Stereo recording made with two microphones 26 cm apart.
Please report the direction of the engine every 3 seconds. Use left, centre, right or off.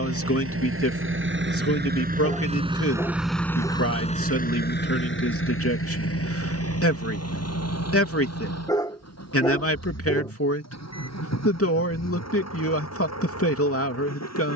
right, left, left, left, left.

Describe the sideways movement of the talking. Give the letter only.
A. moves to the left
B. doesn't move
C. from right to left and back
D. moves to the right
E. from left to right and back
B.